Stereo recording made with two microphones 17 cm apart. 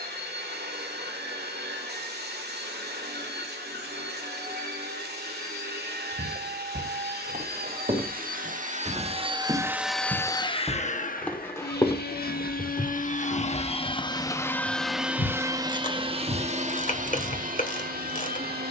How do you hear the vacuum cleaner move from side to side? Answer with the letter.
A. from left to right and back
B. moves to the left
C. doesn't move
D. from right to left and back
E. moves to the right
D.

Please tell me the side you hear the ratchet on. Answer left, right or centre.
left.